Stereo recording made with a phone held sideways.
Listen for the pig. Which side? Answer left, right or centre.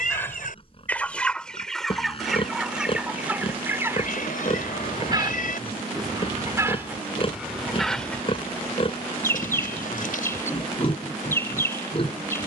left.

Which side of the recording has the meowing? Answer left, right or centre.
left.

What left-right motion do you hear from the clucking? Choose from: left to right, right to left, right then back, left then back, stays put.
right then back.